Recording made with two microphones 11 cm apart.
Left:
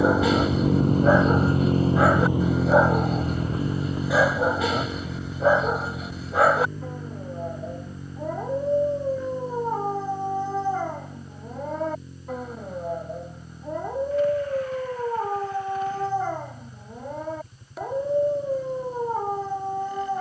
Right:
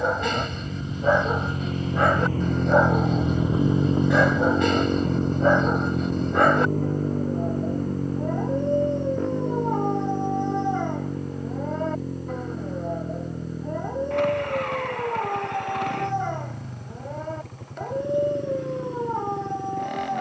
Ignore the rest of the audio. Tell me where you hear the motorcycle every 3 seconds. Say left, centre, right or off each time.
left, right, right, right, right, right, right.